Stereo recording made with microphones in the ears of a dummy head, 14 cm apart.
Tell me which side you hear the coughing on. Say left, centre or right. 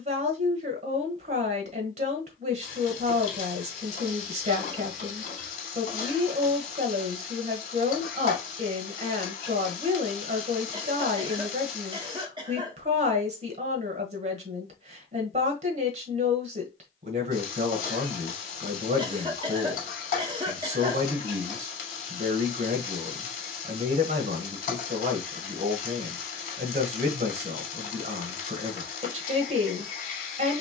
right.